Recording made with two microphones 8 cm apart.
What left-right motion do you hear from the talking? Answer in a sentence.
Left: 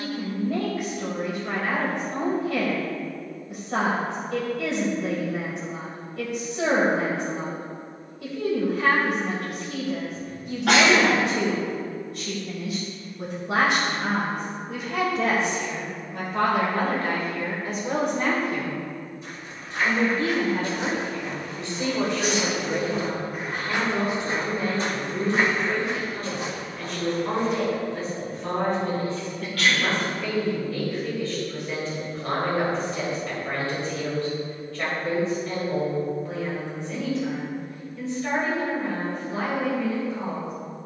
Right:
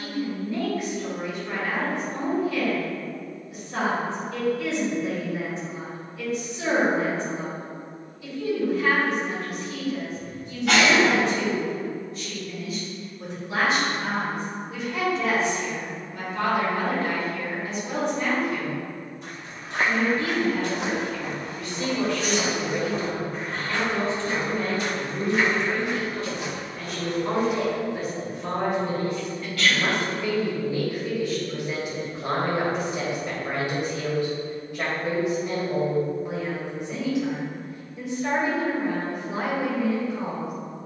You can hear the talking travel towards the right.